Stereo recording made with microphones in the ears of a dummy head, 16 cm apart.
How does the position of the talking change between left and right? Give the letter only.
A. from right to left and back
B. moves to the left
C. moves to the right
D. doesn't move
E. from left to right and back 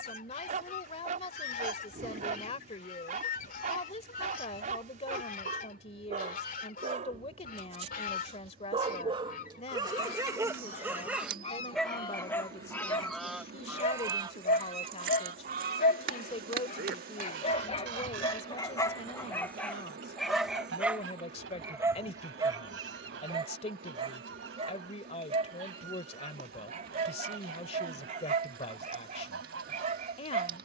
D.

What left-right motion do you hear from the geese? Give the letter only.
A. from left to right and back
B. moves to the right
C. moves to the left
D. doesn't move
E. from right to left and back
B.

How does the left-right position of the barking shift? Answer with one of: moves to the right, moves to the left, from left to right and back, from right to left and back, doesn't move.
from right to left and back.